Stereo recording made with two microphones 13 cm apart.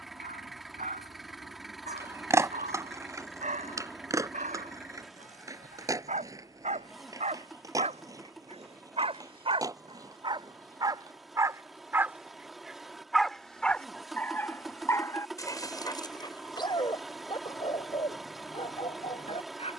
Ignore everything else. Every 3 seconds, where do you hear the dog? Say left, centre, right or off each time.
right, right, right, right, centre, left, left.